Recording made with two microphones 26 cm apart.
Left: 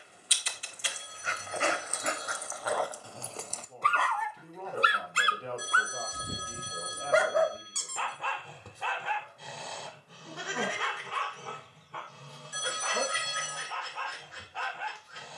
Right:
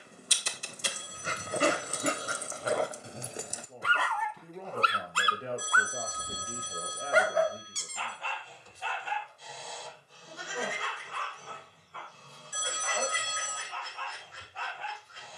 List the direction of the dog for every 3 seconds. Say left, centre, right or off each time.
right, centre, left, left, left.